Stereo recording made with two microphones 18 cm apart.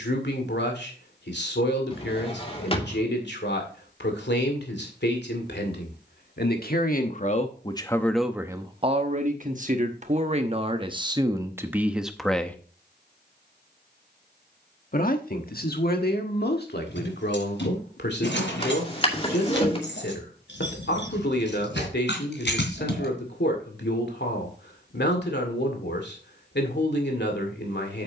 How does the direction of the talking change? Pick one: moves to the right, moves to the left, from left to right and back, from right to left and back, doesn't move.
from left to right and back.